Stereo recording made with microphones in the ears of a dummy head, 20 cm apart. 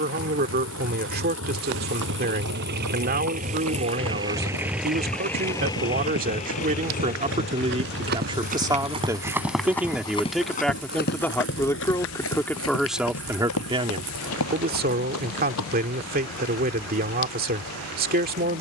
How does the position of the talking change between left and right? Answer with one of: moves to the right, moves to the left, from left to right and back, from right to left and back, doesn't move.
from right to left and back.